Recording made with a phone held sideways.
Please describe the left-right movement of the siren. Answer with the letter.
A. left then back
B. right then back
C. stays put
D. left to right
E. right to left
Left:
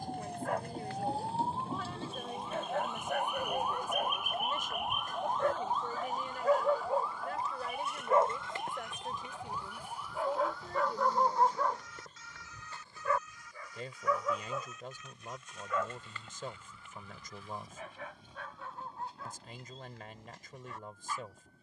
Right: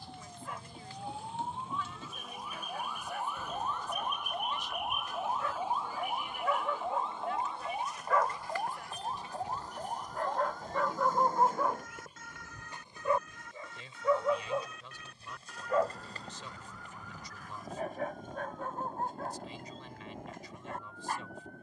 D.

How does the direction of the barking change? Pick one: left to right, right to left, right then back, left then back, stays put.
left to right.